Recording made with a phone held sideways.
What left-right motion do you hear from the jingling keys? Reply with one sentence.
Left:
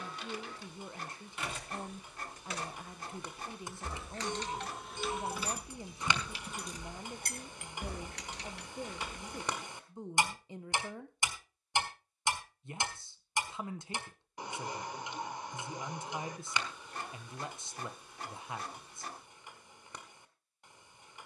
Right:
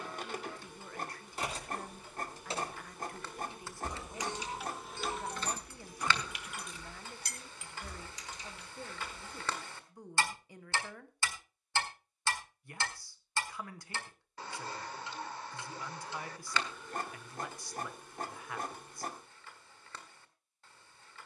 You can hear the jingling keys move to the left.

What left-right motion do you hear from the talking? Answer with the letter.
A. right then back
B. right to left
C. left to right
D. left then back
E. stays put
E.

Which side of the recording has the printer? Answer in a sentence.
In this clip you hear the printer on the right.